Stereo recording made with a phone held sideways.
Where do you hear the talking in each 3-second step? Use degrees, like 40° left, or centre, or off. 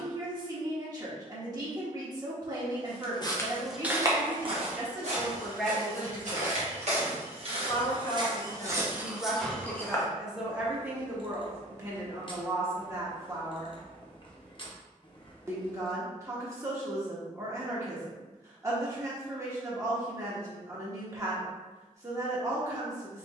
30° right, 10° right, 20° left, 10° right, 20° right, 20° right, 20° right, 20° right.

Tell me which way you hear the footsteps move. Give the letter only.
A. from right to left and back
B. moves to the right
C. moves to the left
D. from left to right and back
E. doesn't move
D.